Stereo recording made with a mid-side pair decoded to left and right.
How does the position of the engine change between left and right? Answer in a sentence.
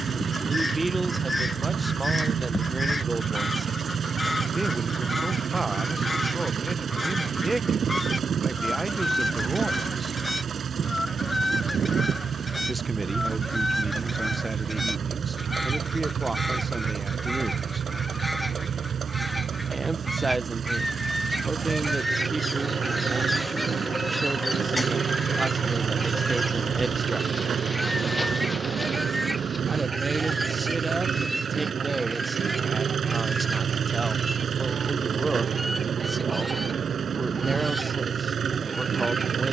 In this clip you hear the engine stay in one place.